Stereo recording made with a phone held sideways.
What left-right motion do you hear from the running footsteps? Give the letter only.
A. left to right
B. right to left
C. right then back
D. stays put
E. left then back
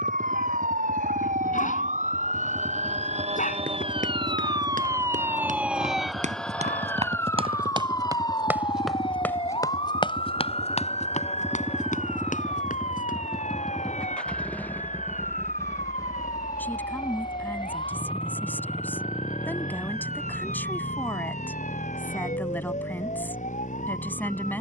B.